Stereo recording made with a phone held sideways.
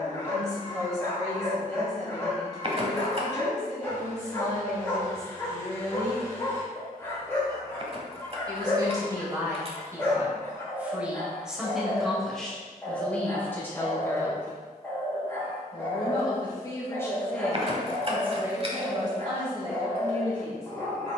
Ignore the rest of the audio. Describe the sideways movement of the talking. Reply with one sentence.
In this clip you hear the talking move from right to left and back again.